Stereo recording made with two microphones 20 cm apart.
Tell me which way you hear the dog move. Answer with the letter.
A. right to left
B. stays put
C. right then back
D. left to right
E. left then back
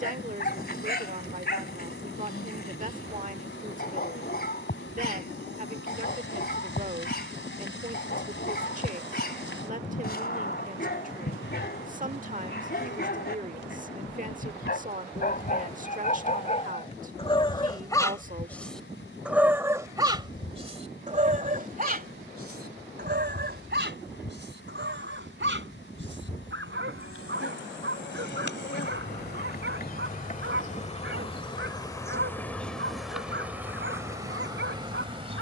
D.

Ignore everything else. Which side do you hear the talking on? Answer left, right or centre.
right.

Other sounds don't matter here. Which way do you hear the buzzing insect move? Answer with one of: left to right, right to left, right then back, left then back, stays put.
left to right.